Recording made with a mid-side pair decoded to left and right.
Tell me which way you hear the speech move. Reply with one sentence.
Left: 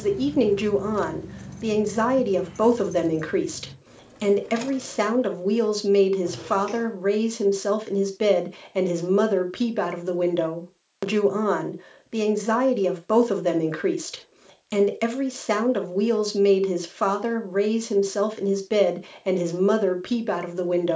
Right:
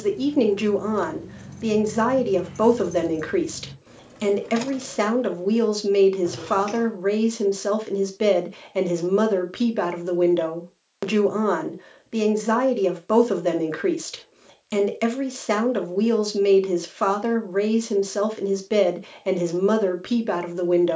In this clip you hear the speech stay in one place.